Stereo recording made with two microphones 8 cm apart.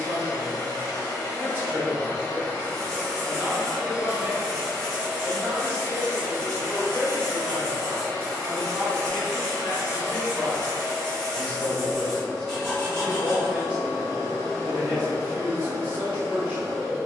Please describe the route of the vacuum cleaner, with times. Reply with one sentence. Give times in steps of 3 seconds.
In this clip you hear the vacuum cleaner on the left from 0 s, in the centre from 3 s and on the right from 6 s.